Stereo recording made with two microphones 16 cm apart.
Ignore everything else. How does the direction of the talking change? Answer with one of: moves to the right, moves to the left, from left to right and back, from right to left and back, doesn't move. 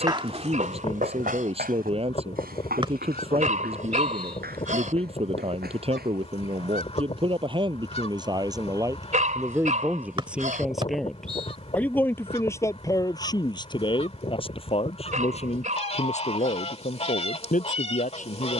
moves to the left.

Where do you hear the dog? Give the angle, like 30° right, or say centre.
50° right.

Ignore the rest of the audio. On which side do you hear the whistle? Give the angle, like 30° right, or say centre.
30° right.